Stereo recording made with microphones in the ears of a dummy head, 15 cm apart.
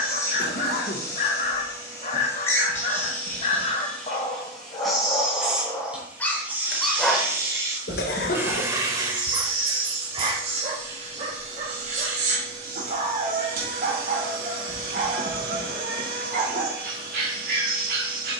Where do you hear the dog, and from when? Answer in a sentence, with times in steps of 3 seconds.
In this clip you hear the dog on the left from 0 s, in the centre from 6 s and on the right from 9 s.